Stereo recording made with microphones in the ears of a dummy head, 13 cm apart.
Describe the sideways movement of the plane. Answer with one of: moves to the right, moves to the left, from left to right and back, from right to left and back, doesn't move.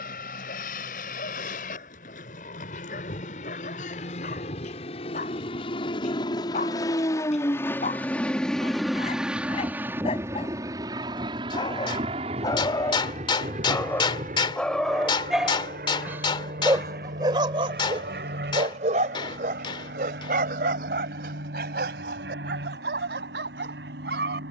moves to the right.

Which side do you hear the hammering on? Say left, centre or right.
left.